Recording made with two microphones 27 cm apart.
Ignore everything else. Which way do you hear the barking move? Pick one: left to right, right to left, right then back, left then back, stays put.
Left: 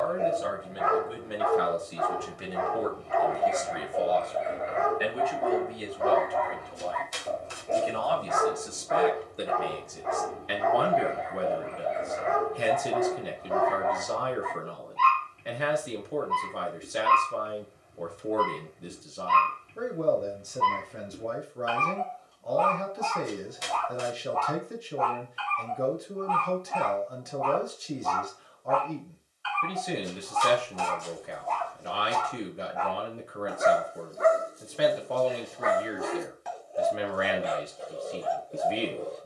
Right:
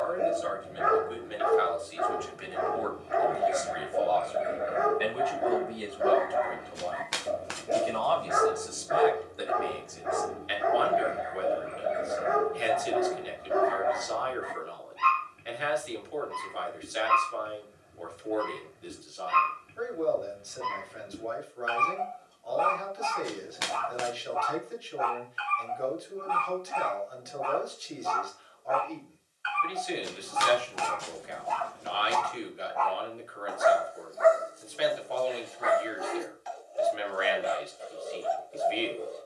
right to left.